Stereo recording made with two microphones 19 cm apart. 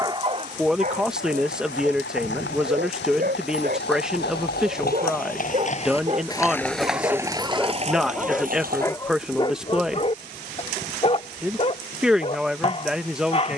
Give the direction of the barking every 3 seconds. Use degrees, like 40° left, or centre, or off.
50° right, 50° right, 10° right, 30° left, 30° left.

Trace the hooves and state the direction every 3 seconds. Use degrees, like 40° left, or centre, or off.
80° left, 60° left, 20° right, off, off.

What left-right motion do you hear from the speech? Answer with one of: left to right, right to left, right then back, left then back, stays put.
stays put.